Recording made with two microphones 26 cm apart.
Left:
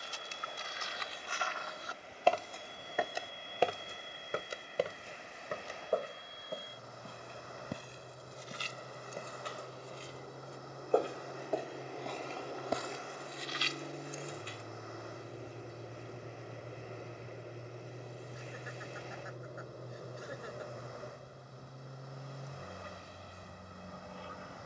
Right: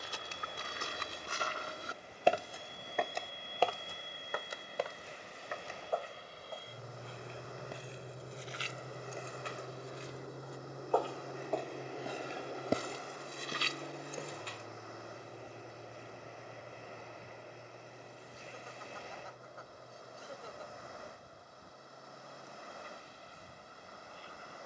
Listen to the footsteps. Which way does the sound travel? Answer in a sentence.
In this clip you hear the footsteps move from right to left and back again.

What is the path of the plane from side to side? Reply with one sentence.
You can hear the plane travel towards the left.